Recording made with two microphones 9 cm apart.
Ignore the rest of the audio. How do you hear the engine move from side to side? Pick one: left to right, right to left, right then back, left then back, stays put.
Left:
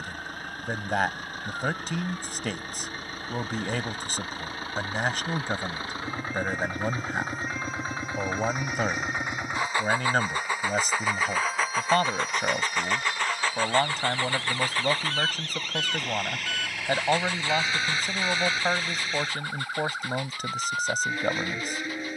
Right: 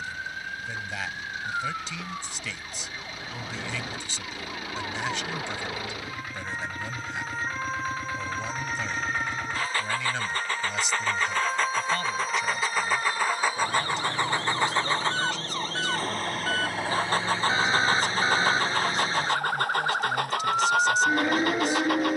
left to right.